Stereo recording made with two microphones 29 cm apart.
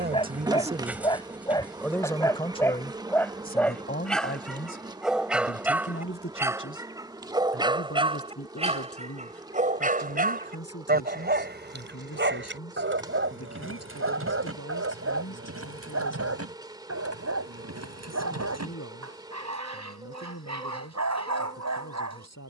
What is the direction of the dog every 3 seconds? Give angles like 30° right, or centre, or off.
10° left, centre, 20° right, 30° right, 50° right, 60° right, 70° right, 70° right.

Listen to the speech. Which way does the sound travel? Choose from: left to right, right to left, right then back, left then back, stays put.
right to left.